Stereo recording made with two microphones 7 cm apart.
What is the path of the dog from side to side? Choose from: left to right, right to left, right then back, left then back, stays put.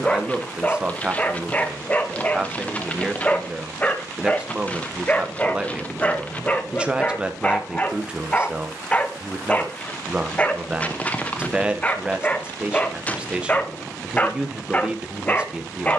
stays put.